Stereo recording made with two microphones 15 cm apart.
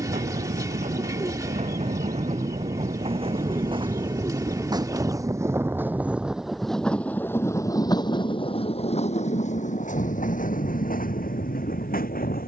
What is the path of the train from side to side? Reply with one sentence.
In this clip you hear the train move from right to left.